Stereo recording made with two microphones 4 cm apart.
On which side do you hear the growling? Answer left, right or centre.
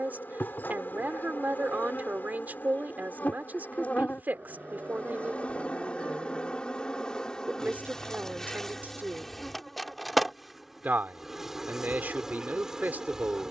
right.